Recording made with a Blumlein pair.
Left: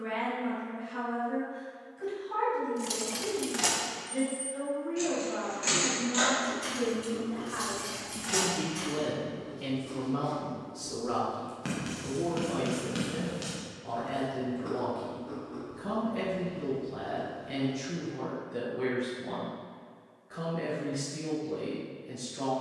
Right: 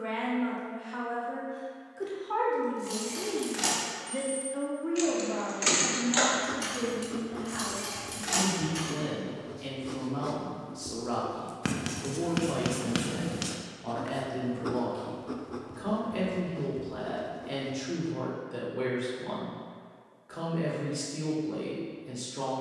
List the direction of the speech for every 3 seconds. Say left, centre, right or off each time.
right, right, centre, centre, right, right, right, right.